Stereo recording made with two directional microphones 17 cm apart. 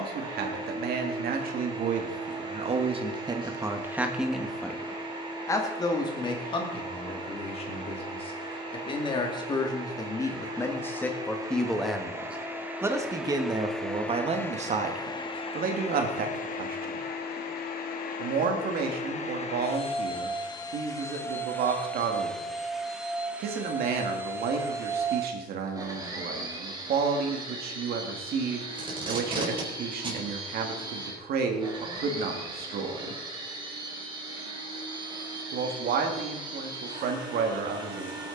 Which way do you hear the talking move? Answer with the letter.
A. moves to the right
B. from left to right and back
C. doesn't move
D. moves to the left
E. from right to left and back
E.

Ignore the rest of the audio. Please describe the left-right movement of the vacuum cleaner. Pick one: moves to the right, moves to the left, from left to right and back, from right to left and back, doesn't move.
from right to left and back.